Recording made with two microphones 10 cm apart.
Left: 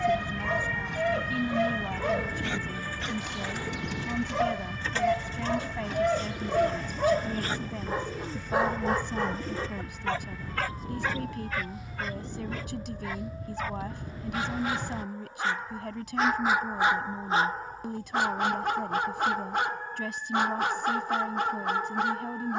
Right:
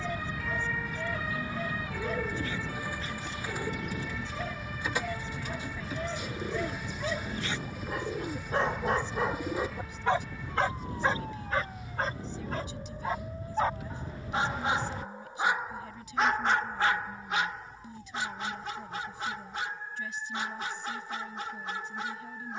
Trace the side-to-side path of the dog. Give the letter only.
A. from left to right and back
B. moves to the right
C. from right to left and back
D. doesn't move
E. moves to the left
A.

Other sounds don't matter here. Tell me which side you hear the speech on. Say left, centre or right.
left.